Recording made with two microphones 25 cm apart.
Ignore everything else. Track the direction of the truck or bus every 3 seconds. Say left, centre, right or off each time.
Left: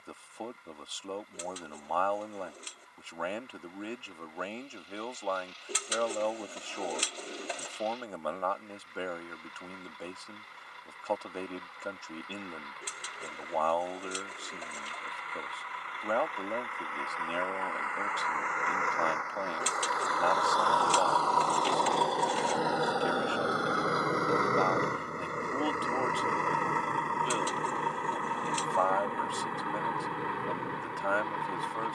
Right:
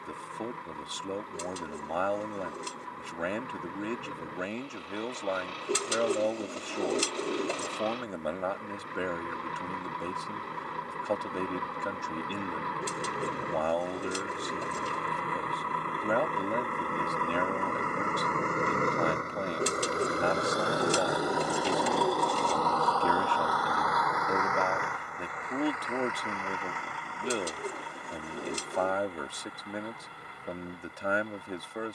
right, right, right, right, right, right, right, centre, left, left, left.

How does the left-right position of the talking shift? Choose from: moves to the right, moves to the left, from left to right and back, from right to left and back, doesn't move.
doesn't move.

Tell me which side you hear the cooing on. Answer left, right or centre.
right.